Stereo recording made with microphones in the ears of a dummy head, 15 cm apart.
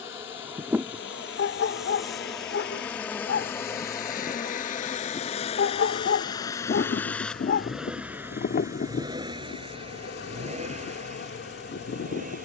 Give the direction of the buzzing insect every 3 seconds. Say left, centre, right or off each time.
centre, left, left, left.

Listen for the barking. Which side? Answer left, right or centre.
left.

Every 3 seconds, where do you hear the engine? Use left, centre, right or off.
left, left, centre, right.